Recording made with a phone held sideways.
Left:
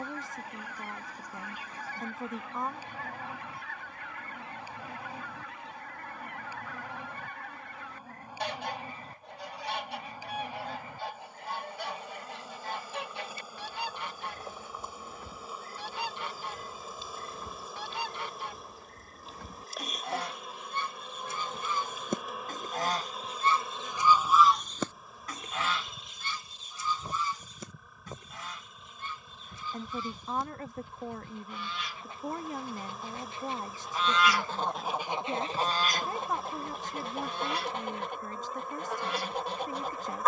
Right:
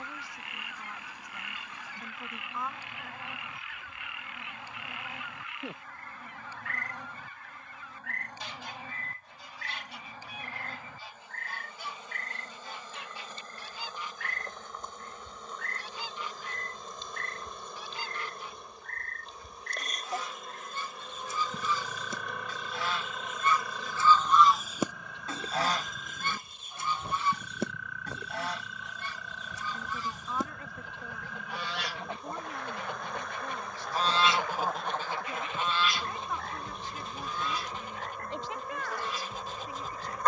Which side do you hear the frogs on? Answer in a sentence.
You can hear the frogs on the right.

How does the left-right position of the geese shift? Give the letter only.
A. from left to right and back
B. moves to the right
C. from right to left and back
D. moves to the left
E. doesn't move
A.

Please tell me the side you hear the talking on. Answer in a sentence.
You can hear the talking on the left.